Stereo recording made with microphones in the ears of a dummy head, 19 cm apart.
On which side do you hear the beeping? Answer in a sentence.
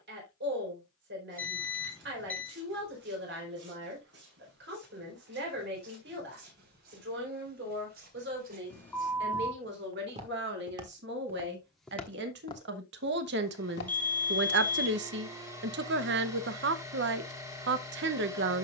In this clip you hear the beeping in the centre.